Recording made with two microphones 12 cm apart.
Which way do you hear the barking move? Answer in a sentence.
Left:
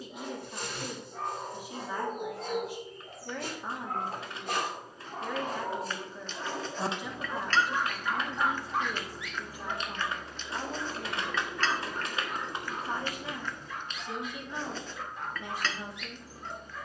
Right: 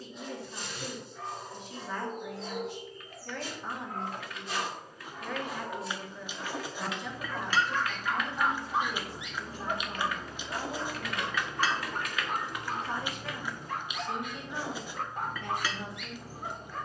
You can hear the barking move from left to right.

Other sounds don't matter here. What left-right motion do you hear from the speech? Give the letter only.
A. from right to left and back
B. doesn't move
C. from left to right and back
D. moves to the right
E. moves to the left
B.